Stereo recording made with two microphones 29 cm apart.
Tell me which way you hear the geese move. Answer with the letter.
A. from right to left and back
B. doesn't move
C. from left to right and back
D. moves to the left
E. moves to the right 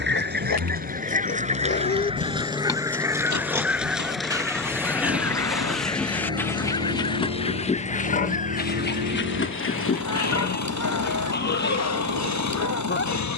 D.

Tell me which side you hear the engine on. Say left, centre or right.
right.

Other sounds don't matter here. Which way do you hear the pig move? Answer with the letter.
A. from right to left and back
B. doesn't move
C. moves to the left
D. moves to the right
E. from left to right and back
E.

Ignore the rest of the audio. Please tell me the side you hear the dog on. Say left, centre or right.
left.